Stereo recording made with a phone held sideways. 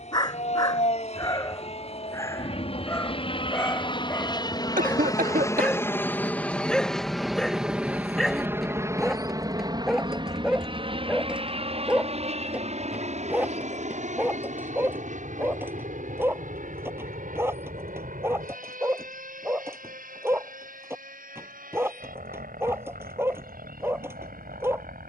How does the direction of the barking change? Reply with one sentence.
You can hear the barking move from left to right.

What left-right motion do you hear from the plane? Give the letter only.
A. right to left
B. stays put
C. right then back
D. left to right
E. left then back
D.